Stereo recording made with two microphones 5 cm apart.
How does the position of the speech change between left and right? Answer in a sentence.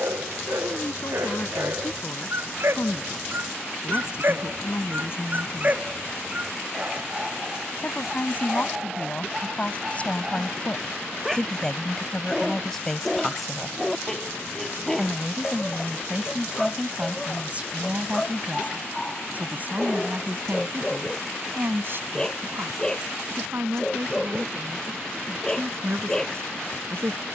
You can hear the speech travel towards the right.